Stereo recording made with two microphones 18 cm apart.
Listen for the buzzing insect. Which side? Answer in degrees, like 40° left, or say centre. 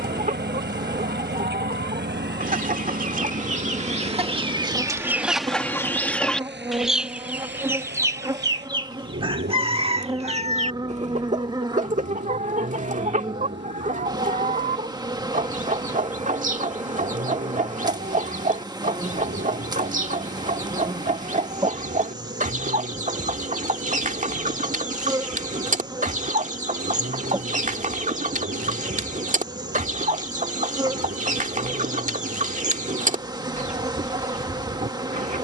20° right.